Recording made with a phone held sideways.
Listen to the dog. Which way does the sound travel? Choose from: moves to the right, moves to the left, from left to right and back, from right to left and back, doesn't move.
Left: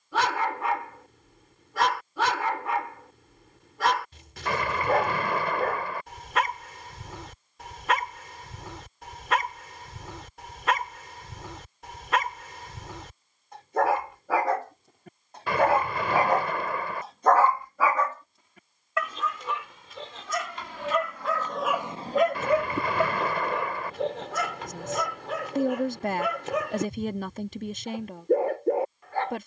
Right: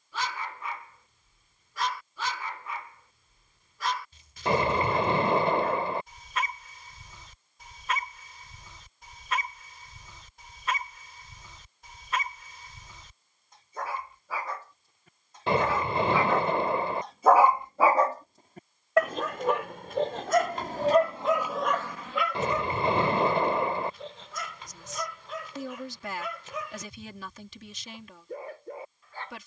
from left to right and back.